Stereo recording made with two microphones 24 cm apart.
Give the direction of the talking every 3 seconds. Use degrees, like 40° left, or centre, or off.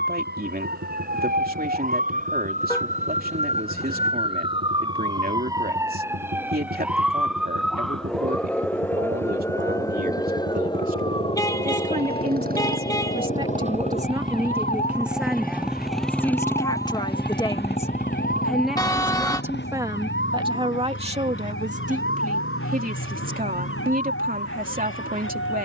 40° right, 40° right, 40° right, 40° right, 20° right, 10° left, 10° right, 30° right, 40° right.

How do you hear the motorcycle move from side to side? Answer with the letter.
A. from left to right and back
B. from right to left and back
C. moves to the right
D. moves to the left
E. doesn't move
D.